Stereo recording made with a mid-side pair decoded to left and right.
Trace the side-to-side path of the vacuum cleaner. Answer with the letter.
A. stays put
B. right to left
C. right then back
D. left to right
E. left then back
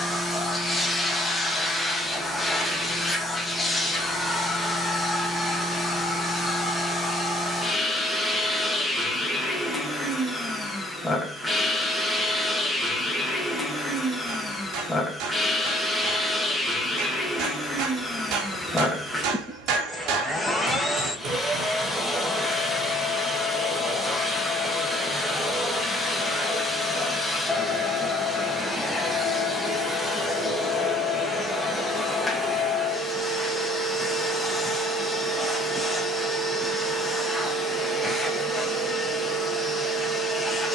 A.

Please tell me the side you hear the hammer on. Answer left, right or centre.
right.